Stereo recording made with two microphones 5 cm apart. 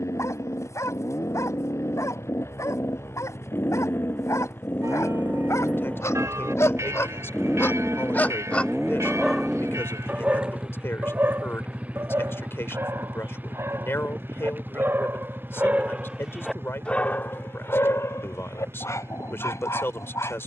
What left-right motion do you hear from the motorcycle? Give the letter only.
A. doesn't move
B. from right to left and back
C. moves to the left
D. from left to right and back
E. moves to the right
E.